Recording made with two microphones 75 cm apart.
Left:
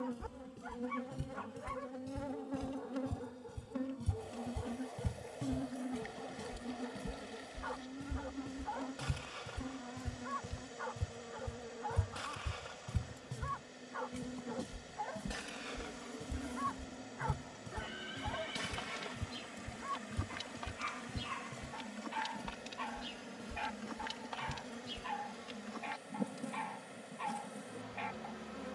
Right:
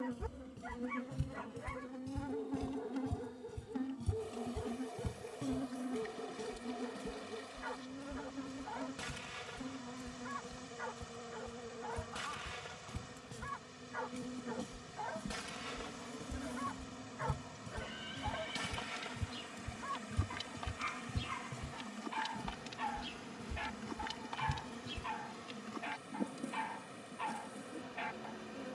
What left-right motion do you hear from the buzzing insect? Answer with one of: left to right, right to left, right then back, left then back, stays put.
right then back.